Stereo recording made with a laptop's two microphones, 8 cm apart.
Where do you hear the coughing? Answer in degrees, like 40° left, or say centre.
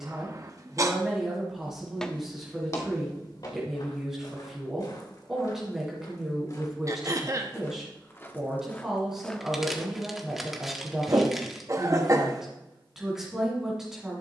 40° right.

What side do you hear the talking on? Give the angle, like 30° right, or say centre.
10° right.